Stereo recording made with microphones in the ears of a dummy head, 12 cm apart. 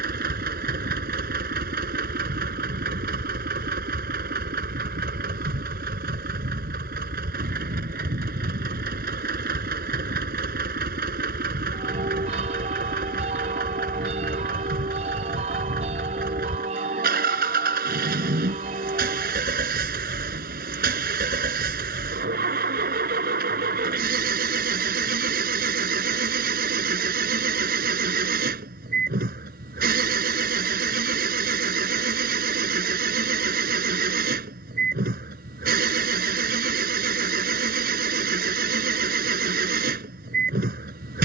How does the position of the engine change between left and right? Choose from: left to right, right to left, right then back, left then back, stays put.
stays put.